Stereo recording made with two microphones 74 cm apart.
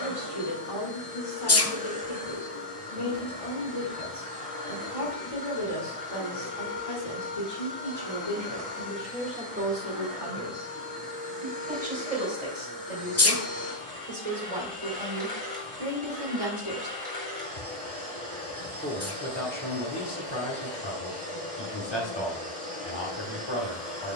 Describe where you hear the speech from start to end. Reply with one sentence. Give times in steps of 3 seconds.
In this clip you hear the speech on the left from 0 s, on the right from 9 s and on the left from 18 s.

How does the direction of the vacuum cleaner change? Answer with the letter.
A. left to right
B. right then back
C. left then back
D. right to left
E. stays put
E.